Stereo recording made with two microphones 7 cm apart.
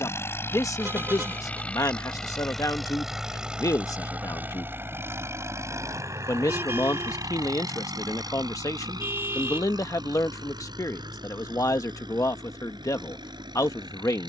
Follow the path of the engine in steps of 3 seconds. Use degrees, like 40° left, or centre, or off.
20° left, 20° right, 50° right, 70° right, 70° right.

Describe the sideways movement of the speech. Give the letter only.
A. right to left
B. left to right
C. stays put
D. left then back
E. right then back
C.